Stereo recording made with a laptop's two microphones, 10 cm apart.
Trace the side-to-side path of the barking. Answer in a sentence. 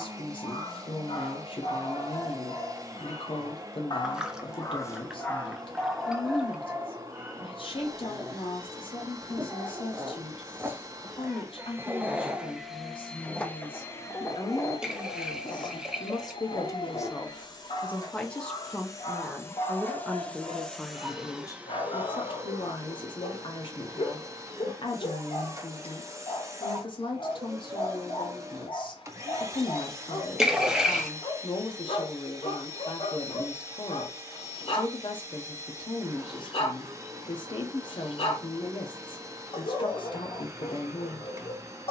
In this clip you hear the barking move from left to right and back again.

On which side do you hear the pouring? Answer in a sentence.
In this clip you hear the pouring in the centre.